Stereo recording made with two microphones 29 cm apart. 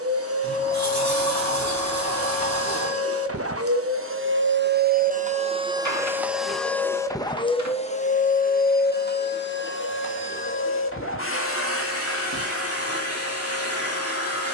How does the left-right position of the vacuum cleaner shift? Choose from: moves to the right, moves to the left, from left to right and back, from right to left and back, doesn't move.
moves to the left.